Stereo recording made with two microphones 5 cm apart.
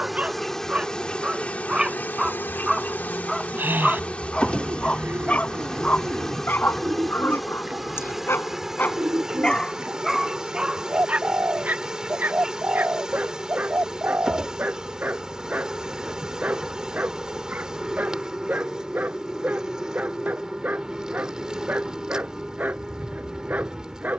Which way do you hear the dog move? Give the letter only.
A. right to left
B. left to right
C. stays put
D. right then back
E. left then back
E.